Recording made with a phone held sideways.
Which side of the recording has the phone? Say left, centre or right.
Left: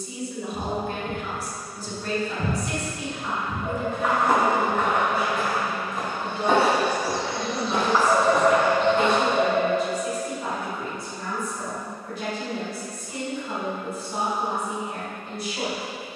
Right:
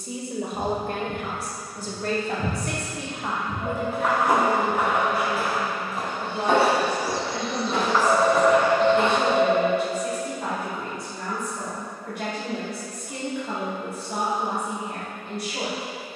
right.